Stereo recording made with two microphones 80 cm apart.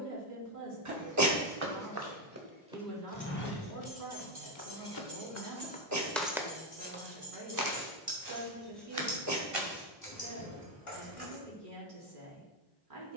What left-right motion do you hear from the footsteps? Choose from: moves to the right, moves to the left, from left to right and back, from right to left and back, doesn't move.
from right to left and back.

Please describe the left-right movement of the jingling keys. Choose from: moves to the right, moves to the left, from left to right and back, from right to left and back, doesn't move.
moves to the left.